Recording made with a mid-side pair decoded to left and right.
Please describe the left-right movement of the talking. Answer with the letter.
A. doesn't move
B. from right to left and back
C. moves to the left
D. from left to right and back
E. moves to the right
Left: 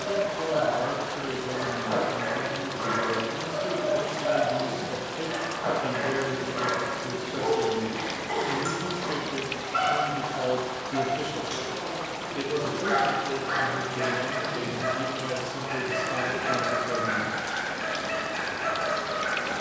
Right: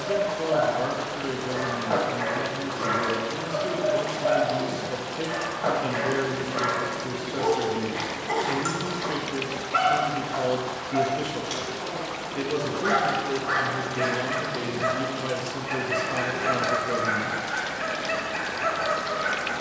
A.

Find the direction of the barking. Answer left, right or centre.
right.